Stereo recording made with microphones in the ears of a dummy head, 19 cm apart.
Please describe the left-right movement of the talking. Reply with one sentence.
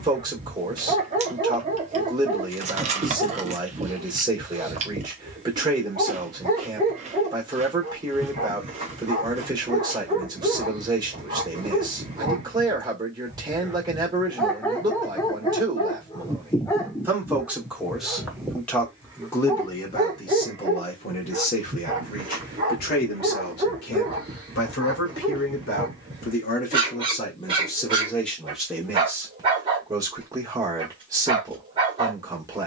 In this clip you hear the talking go left and come back.